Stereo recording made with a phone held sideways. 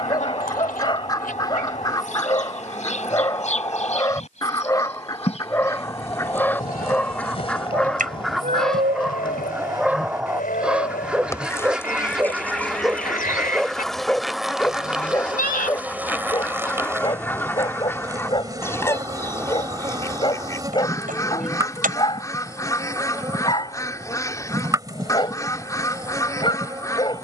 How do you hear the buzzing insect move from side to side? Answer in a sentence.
In this clip you hear the buzzing insect travel towards the right.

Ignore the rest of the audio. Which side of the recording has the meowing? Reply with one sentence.
You can hear the meowing on the right.